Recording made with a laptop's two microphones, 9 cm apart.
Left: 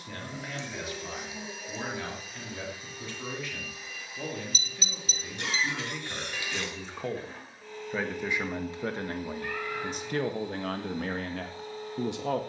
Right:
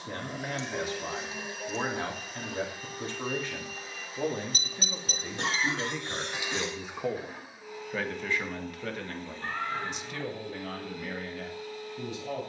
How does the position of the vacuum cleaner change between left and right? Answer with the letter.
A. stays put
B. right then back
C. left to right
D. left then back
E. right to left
E.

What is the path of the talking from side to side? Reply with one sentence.
In this clip you hear the talking move to the left.